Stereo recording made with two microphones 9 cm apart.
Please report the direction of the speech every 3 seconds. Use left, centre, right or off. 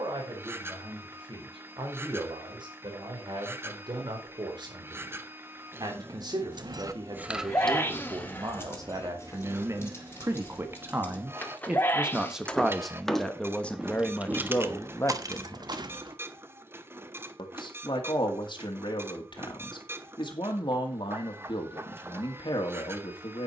right, right, right, right, centre, left, left, left.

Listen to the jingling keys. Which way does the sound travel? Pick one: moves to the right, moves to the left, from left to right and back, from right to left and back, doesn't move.
from right to left and back.